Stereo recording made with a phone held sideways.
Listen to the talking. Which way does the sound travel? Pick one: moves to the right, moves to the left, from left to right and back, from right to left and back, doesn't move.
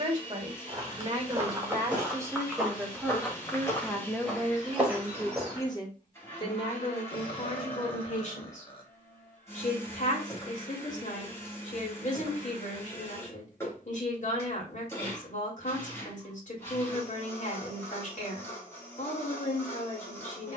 moves to the left.